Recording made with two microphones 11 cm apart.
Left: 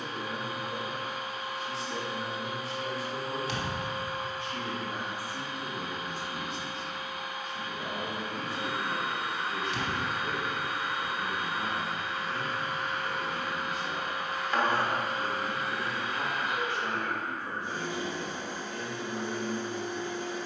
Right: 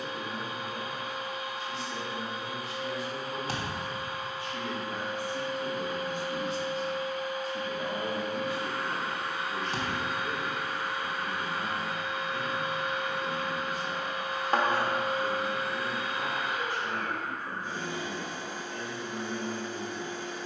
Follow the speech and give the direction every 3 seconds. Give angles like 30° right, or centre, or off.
30° left, 20° left, 20° right, 10° left, 30° left, 30° left, 30° left.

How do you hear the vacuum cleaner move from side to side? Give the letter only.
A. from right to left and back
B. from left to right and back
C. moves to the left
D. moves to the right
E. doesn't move
E.